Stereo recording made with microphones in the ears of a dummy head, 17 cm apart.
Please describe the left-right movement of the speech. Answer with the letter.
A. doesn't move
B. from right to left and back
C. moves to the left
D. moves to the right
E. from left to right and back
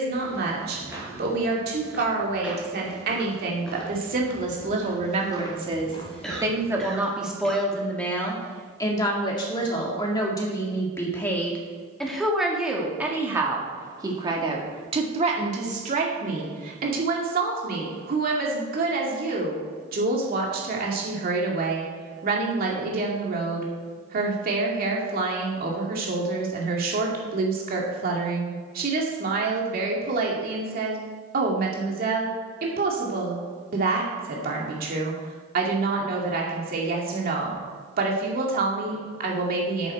B.